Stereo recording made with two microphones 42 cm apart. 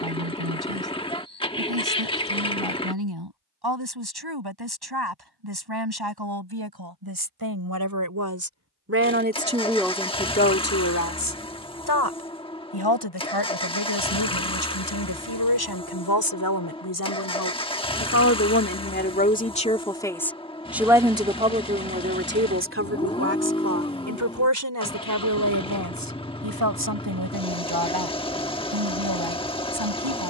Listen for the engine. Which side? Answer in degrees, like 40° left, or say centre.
10° left.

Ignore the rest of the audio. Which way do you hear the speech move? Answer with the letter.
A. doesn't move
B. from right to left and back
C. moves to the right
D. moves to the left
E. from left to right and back
B.